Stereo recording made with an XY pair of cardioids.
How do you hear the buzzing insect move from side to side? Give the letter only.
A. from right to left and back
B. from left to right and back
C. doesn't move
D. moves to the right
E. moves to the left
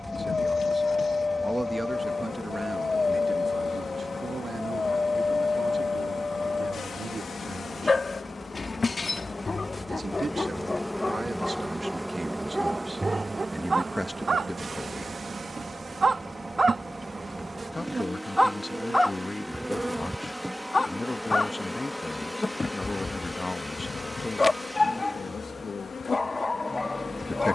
B.